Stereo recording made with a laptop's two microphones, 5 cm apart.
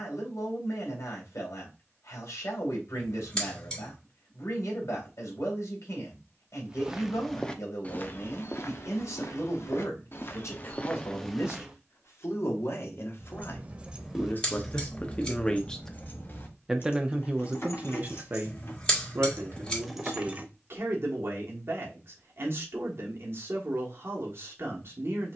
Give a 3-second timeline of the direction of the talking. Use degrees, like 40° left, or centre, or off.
70° left, 70° left, 70° left, 70° left, 50° left, 10° right, 50° right, 50° right, 50° right.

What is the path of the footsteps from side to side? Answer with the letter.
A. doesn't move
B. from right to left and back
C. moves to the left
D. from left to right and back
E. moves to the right
B.